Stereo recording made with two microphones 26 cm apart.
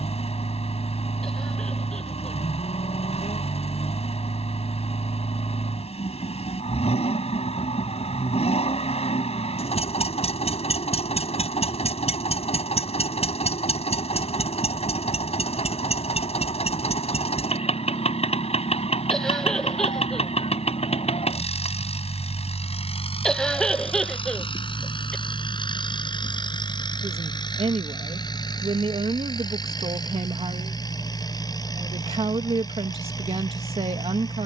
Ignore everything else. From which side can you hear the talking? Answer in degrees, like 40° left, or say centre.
20° right.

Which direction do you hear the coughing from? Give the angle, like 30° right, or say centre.
centre.